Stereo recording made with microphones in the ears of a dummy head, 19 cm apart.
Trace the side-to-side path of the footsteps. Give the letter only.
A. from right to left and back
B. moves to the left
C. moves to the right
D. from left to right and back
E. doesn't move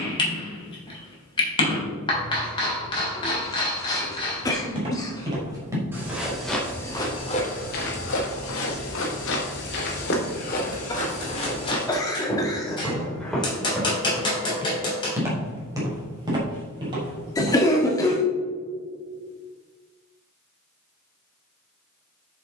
A.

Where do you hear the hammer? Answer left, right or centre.
left.